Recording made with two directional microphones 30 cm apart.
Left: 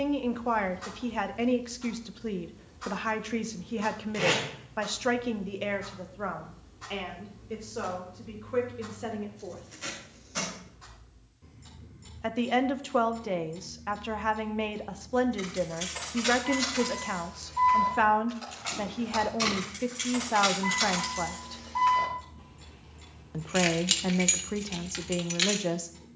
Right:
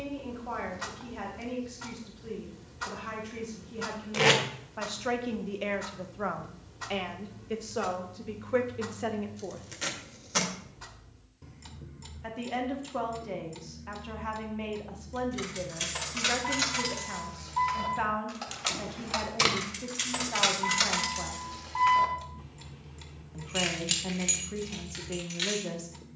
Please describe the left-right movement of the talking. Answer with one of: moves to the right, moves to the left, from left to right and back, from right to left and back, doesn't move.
from left to right and back.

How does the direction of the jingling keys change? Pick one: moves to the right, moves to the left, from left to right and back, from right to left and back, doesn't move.
moves to the left.